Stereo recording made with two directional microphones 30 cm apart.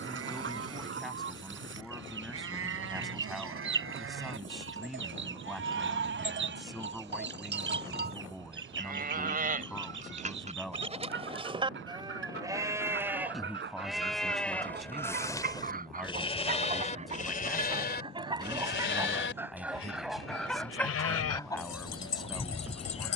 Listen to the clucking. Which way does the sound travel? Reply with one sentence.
You can hear the clucking move from right to left.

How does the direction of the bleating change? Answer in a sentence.
You can hear the bleating go from the right side to the left.